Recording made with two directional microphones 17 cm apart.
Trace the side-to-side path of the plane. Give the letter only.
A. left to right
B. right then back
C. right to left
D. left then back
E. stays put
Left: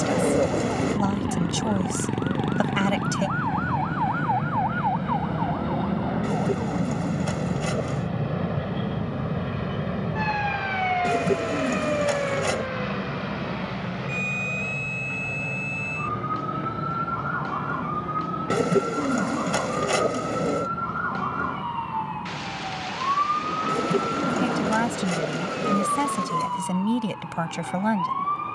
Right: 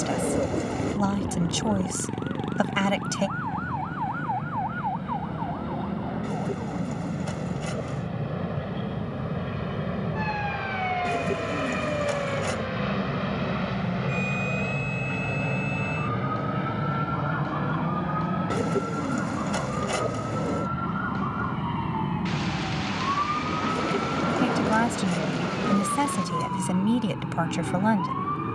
A.